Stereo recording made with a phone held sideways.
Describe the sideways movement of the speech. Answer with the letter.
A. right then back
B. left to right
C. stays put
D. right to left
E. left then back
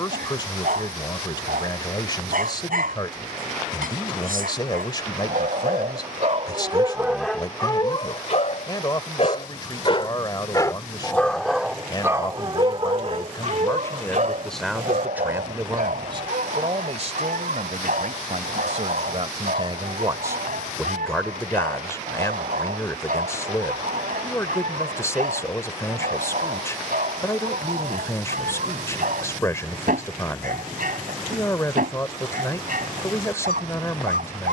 A.